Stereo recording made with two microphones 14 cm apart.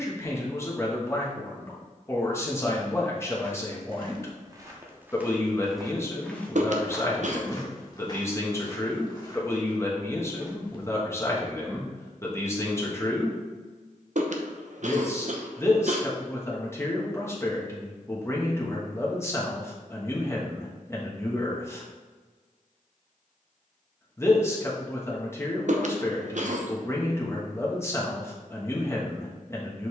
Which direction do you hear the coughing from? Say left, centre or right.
right.